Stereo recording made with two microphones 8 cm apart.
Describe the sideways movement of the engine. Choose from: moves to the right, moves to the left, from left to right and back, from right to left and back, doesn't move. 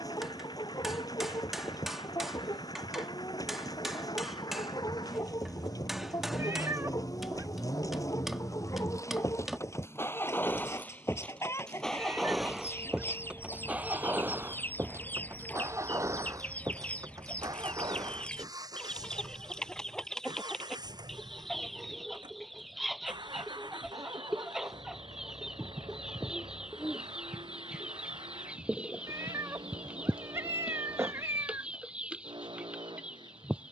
moves to the right.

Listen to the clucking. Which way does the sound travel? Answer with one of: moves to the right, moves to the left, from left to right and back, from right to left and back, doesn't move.
moves to the right.